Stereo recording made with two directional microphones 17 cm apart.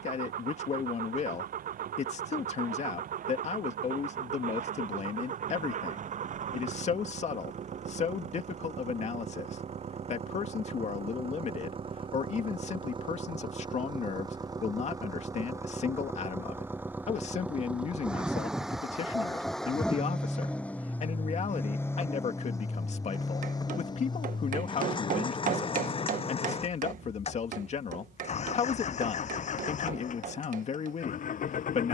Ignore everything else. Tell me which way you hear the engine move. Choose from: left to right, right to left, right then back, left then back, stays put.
right to left.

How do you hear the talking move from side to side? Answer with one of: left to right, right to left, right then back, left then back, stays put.
stays put.